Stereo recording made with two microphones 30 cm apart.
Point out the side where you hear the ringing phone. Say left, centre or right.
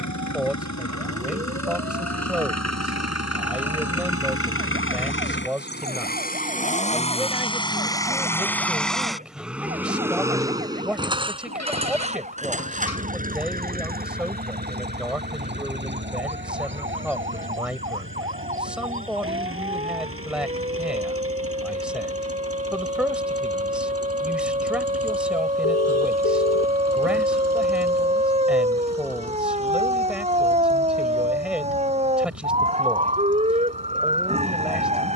left.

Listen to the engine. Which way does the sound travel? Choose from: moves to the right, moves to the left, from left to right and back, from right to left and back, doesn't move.
moves to the right.